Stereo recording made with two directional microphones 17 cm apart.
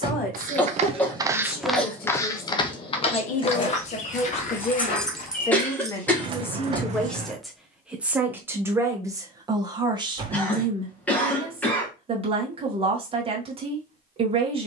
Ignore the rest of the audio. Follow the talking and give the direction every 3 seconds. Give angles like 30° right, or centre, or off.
60° left, 40° left, centre, 30° right, 40° right.